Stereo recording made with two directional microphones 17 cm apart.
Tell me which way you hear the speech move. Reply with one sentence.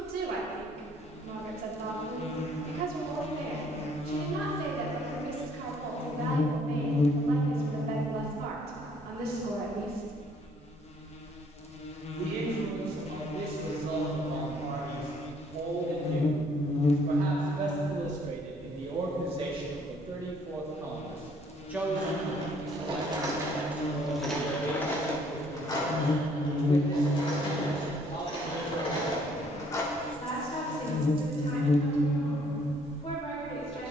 You can hear the speech travel towards the left.